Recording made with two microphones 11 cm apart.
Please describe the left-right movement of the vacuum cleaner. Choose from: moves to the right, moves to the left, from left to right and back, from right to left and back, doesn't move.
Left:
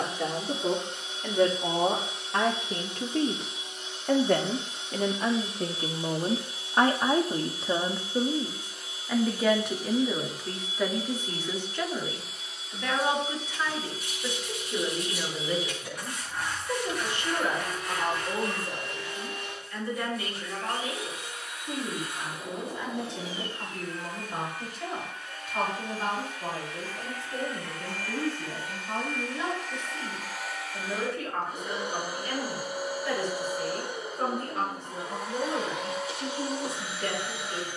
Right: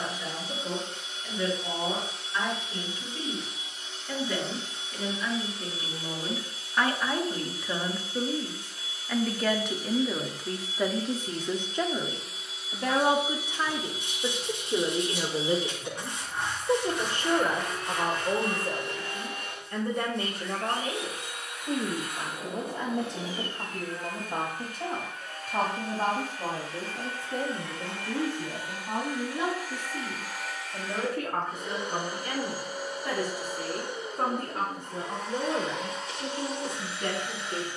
from left to right and back.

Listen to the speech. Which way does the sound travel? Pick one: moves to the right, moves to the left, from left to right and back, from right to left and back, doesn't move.
moves to the right.